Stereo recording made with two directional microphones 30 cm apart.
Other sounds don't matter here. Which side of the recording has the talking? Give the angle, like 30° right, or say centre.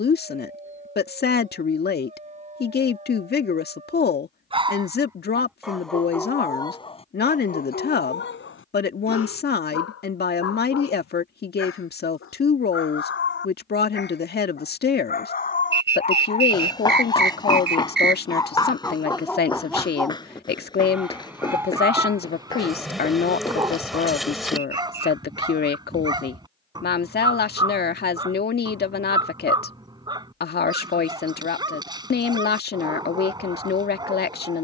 30° left.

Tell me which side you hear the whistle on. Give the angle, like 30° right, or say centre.
40° right.